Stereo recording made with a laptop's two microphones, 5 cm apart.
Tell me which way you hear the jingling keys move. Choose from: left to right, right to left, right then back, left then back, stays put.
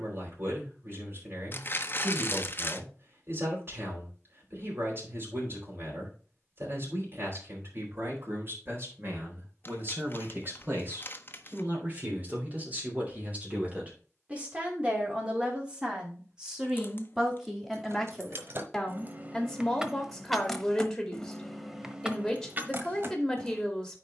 left then back.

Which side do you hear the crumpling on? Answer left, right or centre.
left.